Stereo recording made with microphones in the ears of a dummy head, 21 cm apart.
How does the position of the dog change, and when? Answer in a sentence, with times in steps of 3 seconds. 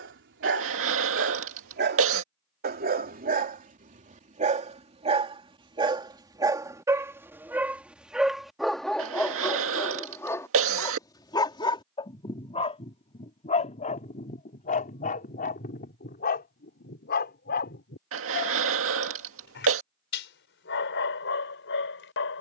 You can hear the dog on the right from 0 s, in the centre from 6 s and on the left from 12 s.